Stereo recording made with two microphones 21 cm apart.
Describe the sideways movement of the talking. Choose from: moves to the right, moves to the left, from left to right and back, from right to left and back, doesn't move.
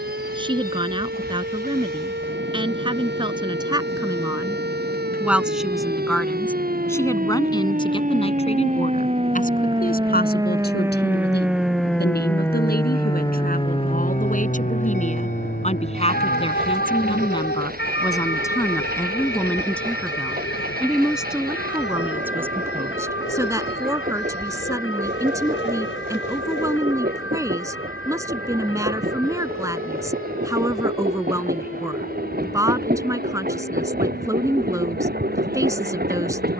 from right to left and back.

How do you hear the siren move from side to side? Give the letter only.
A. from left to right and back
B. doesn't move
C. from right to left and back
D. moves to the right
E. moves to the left
E.